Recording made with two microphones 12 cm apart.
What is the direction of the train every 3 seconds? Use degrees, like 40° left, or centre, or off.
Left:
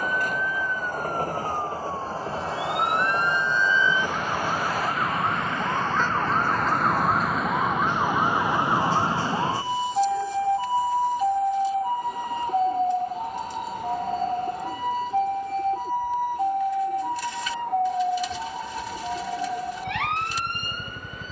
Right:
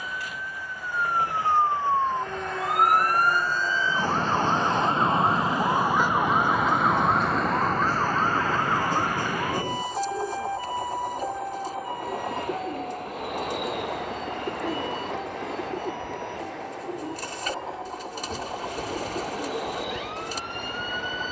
40° left, 10° left, 30° right, 50° right, 70° right, 70° right, 80° right.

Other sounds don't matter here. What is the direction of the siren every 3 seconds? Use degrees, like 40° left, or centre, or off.
50° right, 30° right, centre, 30° left, 50° left, 60° left, 60° left.